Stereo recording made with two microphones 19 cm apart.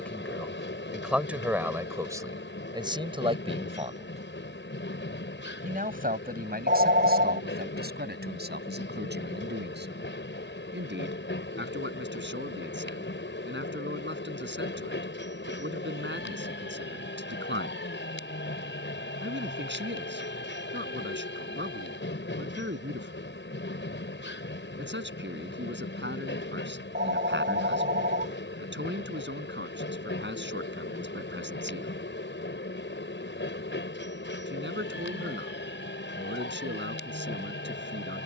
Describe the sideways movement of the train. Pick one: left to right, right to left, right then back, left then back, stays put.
stays put.